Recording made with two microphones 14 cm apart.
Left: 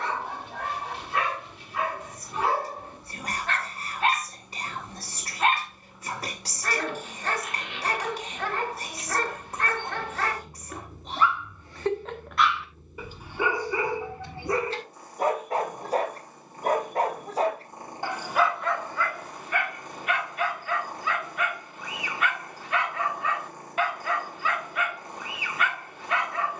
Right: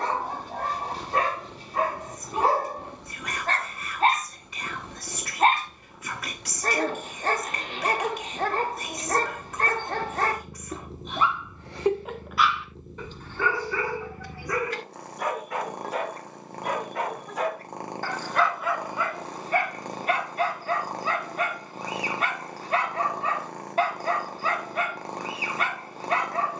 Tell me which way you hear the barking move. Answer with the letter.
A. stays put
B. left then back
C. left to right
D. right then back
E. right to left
B.